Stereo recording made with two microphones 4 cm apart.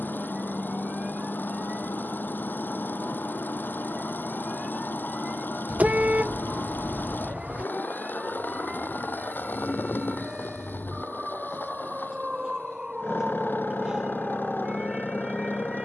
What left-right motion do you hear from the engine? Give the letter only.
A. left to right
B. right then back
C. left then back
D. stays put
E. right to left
D.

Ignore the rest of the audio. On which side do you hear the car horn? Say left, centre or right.
right.